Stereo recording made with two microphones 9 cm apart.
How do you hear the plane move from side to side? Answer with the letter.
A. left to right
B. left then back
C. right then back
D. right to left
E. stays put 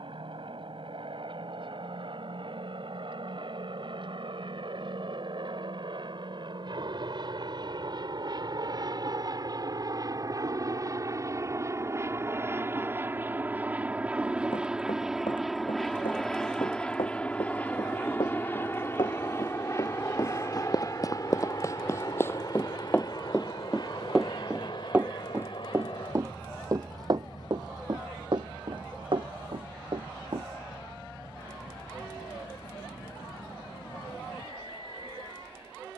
D.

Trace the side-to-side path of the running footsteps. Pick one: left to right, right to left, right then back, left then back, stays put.
left to right.